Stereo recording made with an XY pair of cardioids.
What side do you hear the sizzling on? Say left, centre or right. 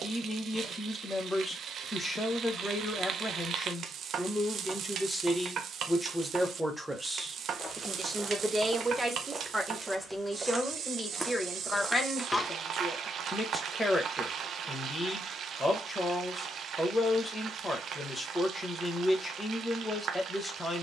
right.